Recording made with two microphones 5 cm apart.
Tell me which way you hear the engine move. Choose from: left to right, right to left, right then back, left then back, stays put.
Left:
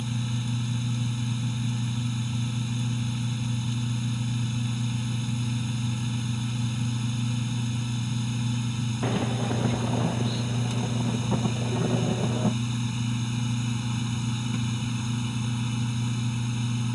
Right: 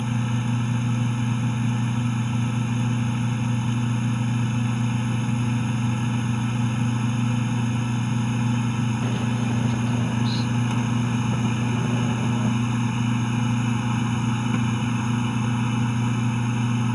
stays put.